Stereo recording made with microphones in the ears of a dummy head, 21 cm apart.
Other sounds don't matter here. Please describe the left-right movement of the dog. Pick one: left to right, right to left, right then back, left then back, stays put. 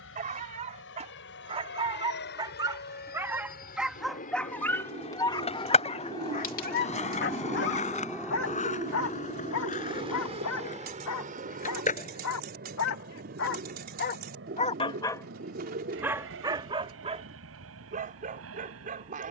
left then back.